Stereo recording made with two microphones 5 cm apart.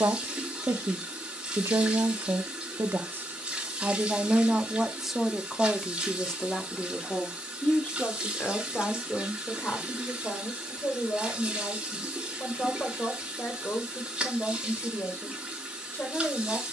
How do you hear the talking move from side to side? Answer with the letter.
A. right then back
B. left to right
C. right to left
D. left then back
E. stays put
C.